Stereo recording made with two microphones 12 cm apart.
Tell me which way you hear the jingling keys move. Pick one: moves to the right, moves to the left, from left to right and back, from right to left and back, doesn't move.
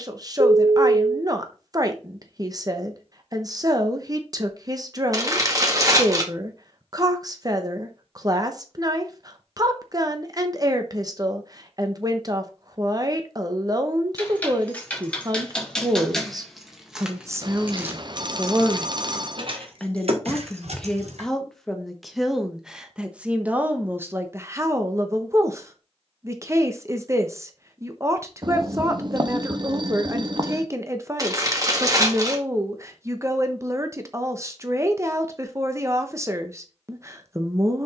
moves to the right.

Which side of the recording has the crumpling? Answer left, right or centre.
right.